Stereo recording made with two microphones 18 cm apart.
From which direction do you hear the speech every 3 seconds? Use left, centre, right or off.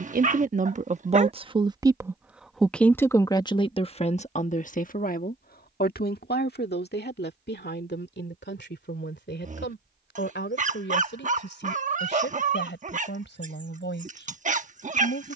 right, left, left, left, left.